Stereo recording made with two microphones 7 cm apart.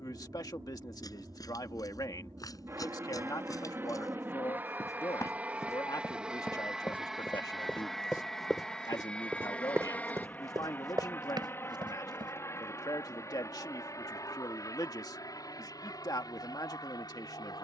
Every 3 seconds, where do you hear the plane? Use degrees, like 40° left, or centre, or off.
50° right, 30° right, centre, 20° left, 40° left, 50° left.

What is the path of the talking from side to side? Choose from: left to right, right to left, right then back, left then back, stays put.
stays put.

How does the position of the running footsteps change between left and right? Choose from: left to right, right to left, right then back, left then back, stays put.
left to right.